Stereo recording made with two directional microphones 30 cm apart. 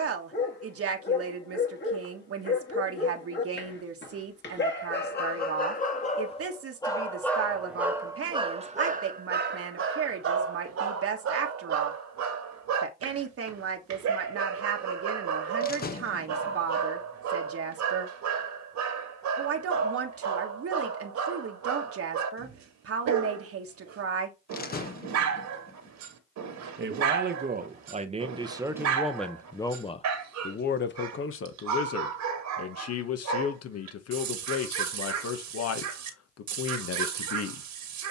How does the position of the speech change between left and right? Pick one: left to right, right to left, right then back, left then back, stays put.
right to left.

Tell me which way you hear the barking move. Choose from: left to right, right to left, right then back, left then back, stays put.
left to right.